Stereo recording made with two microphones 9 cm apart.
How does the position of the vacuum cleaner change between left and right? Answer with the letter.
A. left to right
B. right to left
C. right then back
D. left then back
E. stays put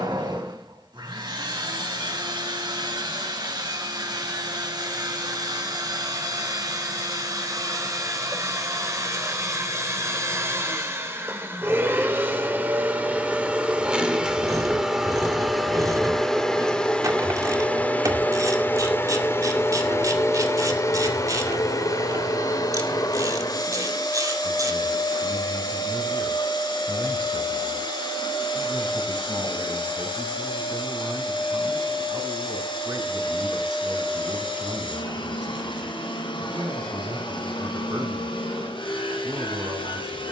B.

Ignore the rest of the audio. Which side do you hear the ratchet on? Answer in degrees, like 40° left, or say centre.
40° right.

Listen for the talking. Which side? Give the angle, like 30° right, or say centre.
50° right.